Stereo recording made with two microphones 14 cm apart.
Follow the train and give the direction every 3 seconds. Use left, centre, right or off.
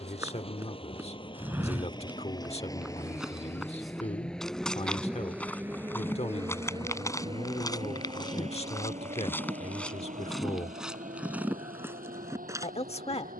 left, centre, right, right, right.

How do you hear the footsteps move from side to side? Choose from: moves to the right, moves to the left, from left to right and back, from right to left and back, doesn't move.
from right to left and back.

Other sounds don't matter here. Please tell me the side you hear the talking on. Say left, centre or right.
left.